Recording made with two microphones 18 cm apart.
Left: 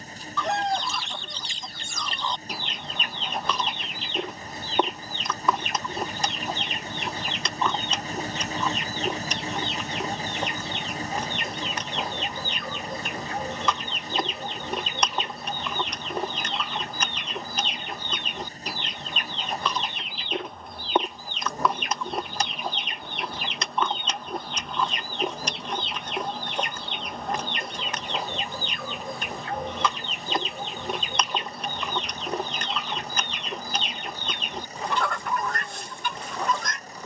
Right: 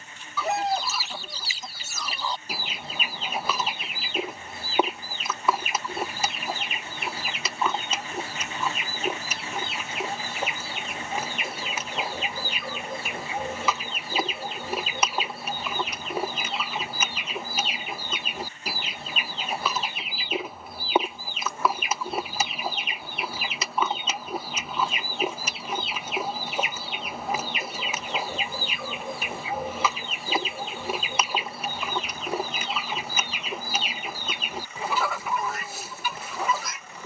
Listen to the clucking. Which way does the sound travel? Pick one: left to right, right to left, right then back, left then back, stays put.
stays put.